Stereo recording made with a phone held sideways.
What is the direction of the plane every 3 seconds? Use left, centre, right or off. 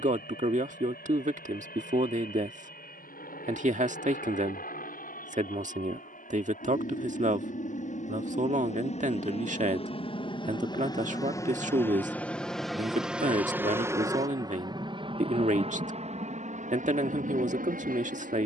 left, left, left, left, centre, right.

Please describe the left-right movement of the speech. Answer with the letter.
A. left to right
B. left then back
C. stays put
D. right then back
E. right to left
C.